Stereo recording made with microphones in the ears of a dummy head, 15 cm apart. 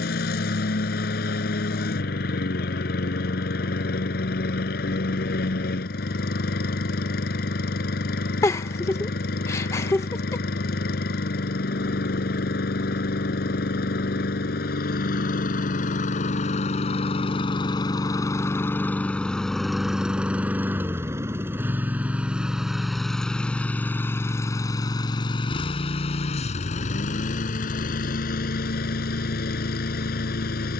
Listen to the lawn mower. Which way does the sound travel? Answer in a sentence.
You can hear the lawn mower move from left to right and back again.